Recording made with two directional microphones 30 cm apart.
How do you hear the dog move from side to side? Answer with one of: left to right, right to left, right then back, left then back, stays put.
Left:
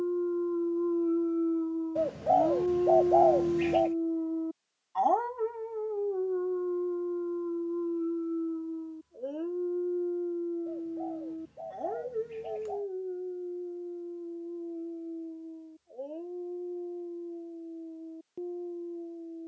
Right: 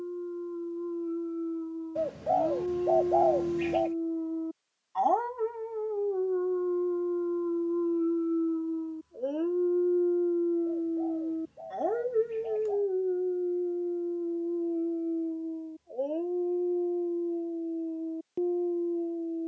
left to right.